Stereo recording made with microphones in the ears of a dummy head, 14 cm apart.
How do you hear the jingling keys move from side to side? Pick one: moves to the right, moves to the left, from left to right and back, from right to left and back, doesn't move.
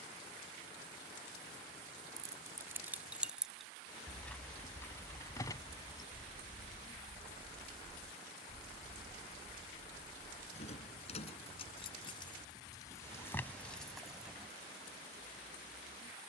from right to left and back.